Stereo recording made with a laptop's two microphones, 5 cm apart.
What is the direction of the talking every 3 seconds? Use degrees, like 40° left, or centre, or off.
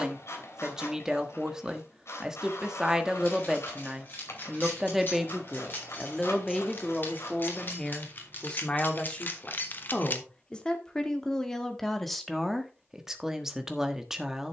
20° right, 10° right, 10° left, 10° left, 10° right.